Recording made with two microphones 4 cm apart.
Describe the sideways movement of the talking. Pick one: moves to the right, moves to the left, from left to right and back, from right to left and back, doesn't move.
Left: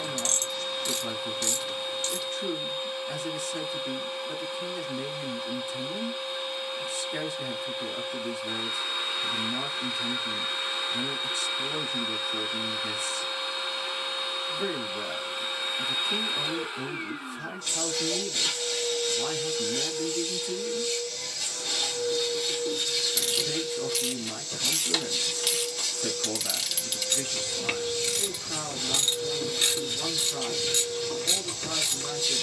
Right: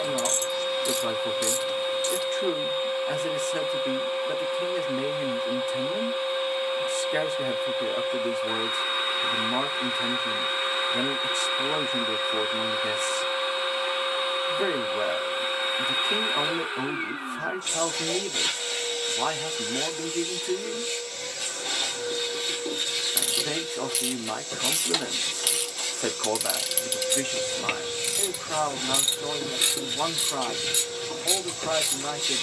doesn't move.